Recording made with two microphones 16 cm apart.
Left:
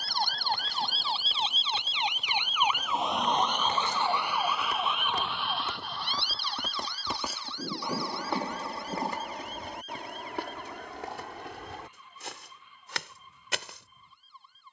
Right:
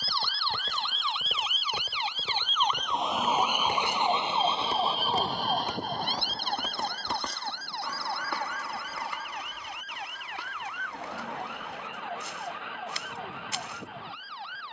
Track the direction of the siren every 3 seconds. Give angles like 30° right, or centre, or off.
30° left, 30° right, 60° right, 70° right, 70° right.